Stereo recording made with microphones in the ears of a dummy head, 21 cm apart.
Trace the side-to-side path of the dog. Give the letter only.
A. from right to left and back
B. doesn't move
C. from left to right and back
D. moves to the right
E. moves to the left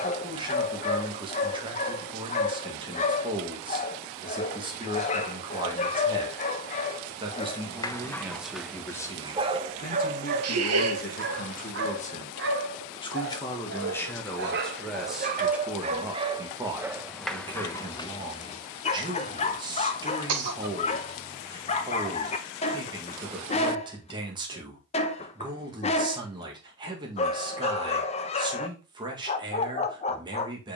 C.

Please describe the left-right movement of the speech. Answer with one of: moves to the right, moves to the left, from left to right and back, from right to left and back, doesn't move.
from right to left and back.